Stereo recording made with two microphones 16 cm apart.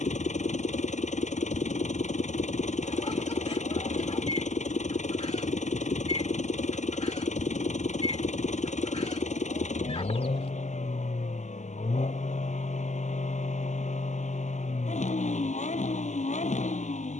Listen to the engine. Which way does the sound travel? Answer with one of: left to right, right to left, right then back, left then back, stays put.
stays put.